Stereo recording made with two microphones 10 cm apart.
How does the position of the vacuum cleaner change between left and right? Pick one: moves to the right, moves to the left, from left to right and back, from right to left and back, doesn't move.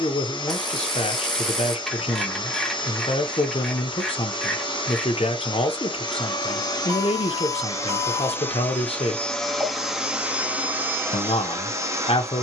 moves to the right.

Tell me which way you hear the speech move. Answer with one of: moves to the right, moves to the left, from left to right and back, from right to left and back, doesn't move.
doesn't move.